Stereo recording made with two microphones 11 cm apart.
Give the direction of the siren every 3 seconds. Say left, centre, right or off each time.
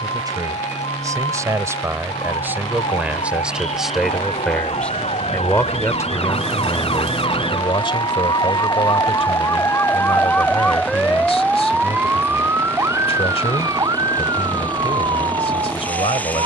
left, left, left, centre, right, right.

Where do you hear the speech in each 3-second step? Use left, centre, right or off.
right, centre, left, left, left, left.